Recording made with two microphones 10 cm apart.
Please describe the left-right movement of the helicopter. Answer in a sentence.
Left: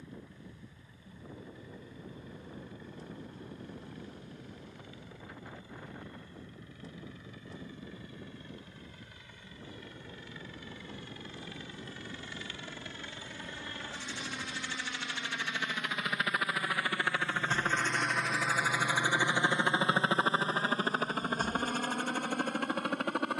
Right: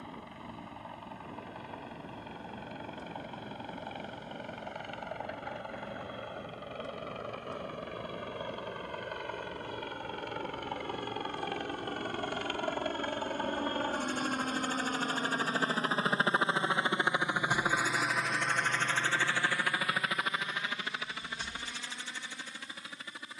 You can hear the helicopter move to the left.